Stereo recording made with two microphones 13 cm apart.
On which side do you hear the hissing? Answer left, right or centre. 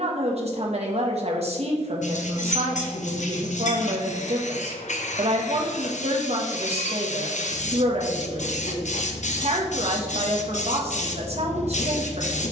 left.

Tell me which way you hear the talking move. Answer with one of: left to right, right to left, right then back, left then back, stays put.
stays put.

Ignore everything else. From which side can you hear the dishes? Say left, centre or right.
left.